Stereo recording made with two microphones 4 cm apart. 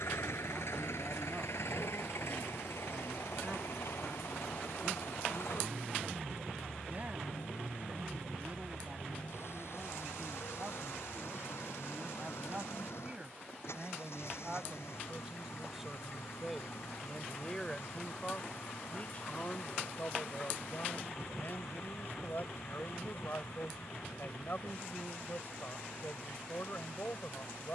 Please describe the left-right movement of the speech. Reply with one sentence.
In this clip you hear the speech travel towards the left.